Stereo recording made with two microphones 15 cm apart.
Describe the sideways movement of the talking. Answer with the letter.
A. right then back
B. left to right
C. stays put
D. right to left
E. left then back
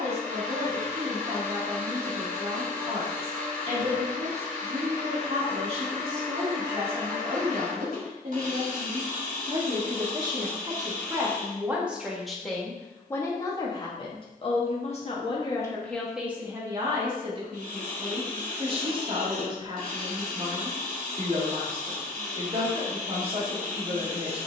E.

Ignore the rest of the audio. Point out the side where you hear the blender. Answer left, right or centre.
right.